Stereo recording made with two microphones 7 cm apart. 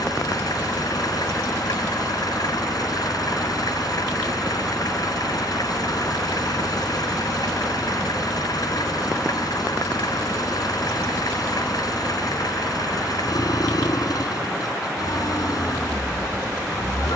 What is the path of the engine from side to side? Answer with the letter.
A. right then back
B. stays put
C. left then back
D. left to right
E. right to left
B.